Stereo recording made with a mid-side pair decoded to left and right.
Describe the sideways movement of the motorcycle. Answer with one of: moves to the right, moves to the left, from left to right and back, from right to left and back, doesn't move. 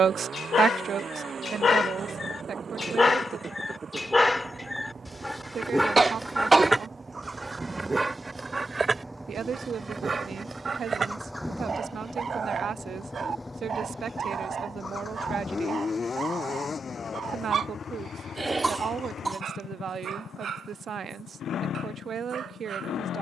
moves to the left.